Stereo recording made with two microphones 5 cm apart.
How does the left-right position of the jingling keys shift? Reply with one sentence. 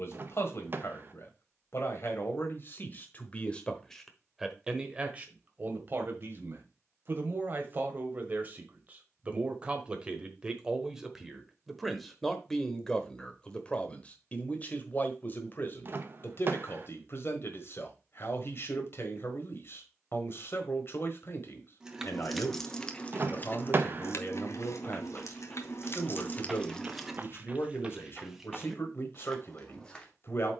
You can hear the jingling keys go left and come back.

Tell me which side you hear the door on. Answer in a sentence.
In this clip you hear the door on the right.